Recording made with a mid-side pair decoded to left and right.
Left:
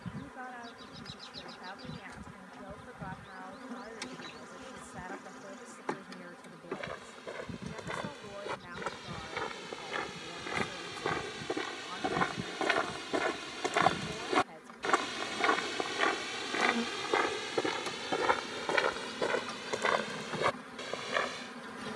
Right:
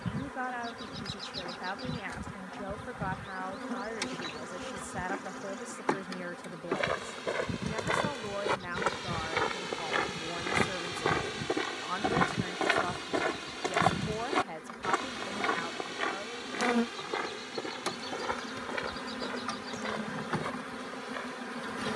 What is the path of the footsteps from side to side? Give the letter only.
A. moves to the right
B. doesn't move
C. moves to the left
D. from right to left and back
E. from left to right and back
C.